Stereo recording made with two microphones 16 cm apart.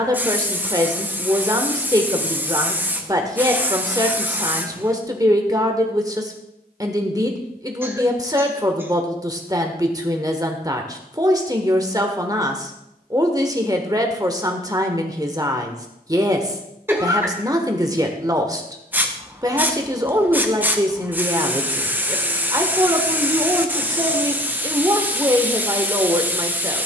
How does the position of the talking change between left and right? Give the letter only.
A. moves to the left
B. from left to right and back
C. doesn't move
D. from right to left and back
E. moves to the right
C.